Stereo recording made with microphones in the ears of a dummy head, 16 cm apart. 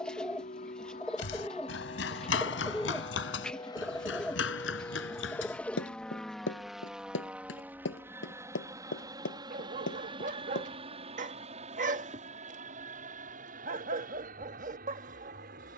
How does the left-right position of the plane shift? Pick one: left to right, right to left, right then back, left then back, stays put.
left to right.